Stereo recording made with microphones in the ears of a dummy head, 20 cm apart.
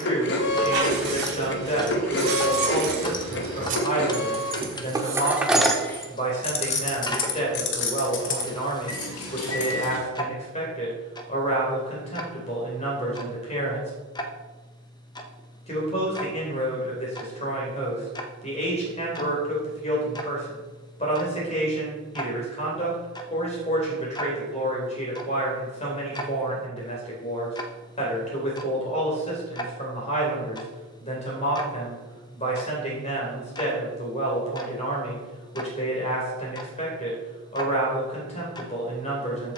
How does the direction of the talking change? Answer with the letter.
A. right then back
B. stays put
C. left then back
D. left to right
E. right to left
B.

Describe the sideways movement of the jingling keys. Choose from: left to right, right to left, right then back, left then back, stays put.
right to left.